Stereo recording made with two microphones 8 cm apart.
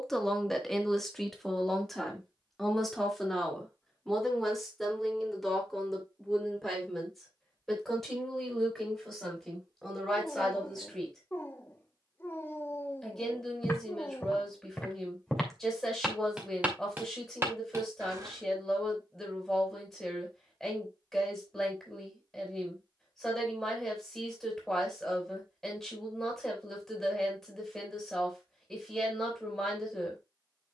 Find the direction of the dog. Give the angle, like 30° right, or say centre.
30° left.